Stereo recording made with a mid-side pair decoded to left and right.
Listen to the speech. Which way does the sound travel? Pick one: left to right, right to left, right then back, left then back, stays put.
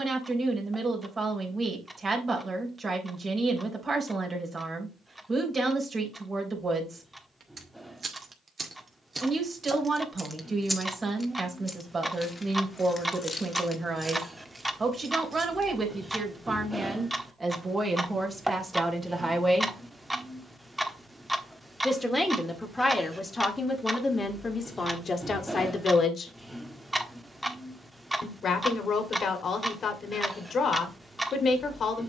right to left.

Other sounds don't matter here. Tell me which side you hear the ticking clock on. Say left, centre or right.
centre.